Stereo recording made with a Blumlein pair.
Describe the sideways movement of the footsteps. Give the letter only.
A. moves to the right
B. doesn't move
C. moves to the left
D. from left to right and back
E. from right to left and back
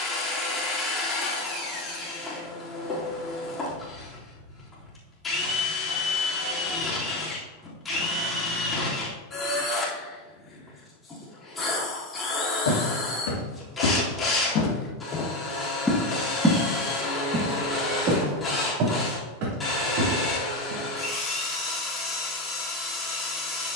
A.